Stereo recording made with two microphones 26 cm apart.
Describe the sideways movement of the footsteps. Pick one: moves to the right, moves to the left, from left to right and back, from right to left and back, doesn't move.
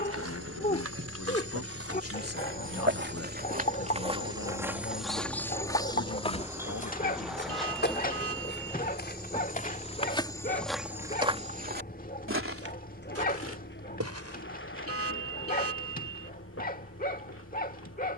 from right to left and back.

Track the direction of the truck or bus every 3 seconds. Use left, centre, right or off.
right, right, centre, left, left, left.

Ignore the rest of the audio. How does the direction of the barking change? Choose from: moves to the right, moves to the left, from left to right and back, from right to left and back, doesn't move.
doesn't move.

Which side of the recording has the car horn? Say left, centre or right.
right.